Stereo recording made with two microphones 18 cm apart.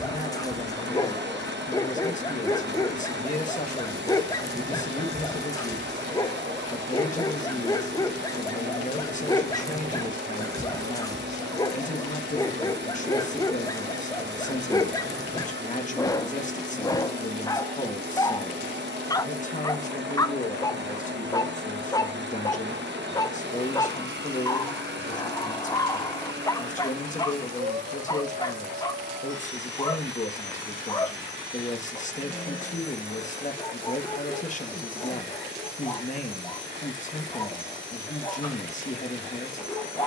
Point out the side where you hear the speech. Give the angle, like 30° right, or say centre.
40° left.